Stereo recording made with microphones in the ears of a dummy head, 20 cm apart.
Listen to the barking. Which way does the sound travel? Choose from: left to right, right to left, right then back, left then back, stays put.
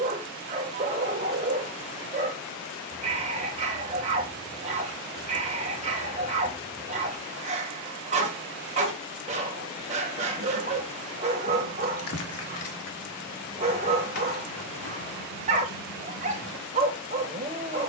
stays put.